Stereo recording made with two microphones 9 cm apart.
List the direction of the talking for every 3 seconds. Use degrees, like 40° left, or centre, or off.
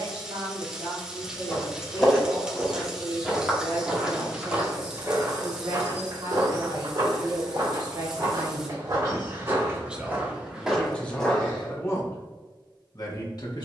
80° right, 70° right, 50° right, centre, 50° left.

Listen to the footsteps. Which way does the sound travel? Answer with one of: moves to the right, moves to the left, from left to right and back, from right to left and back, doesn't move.
from left to right and back.